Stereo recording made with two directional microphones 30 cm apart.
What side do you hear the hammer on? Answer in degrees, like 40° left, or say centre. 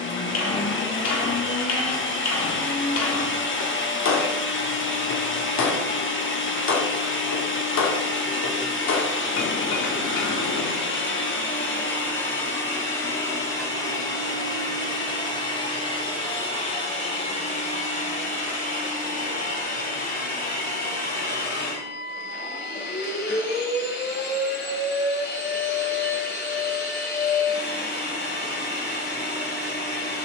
60° left.